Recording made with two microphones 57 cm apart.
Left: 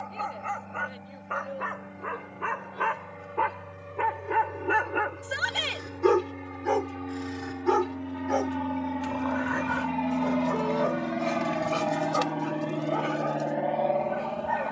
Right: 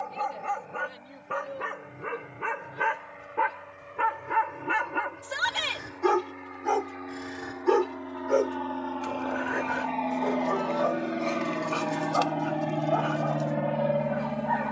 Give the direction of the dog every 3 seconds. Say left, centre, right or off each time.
right, right, centre, left, left.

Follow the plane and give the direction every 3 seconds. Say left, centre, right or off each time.
left, left, left, left, right.